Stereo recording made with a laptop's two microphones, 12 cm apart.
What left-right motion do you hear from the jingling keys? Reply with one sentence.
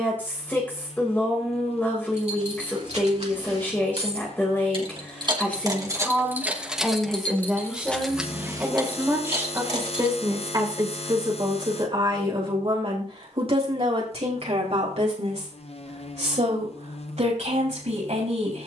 In this clip you hear the jingling keys move from right to left and back again.